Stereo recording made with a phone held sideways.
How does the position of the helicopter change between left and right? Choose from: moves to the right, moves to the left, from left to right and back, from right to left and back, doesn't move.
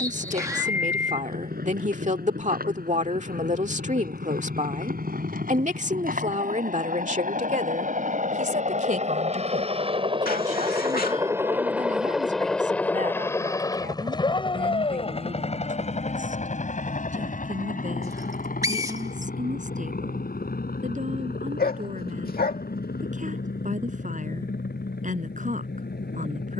moves to the left.